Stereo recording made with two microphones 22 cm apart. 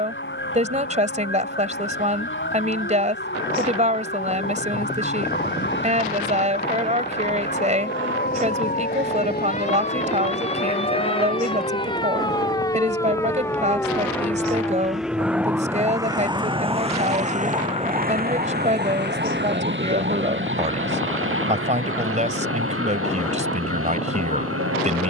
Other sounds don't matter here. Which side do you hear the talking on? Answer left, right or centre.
right.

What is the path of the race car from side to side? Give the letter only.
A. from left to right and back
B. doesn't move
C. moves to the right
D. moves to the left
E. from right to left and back
C.